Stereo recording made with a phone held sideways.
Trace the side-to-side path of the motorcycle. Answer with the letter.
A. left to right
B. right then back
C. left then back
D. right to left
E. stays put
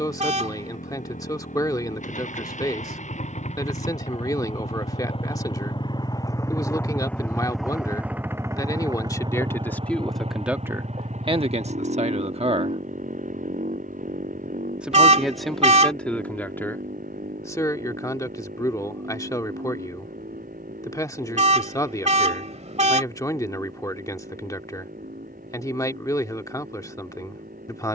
A.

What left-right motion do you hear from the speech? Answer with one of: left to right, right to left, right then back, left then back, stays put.
right then back.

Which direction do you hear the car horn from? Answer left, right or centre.
right.